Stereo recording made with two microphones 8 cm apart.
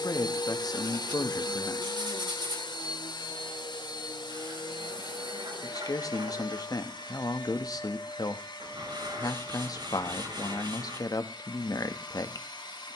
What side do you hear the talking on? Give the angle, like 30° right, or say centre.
50° left.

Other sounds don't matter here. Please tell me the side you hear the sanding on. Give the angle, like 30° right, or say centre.
80° right.